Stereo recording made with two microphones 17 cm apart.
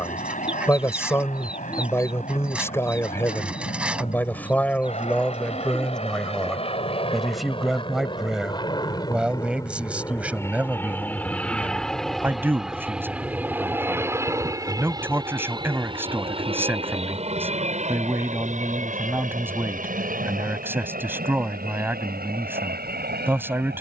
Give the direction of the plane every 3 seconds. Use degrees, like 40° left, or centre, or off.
60° left, 50° left, 30° left, 20° left, 10° right, 30° right, 50° right, 60° right.